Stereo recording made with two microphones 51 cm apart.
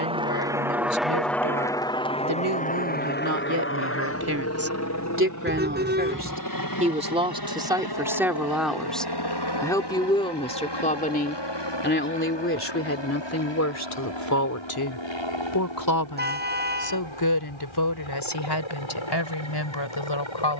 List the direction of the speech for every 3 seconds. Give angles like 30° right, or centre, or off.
40° right, 30° right, 10° right, 10° left, 30° left, 40° left, 50° left.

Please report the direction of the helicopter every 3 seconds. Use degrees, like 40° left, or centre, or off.
centre, 30° left, 40° left, 50° left, 50° left, 60° left, 60° left.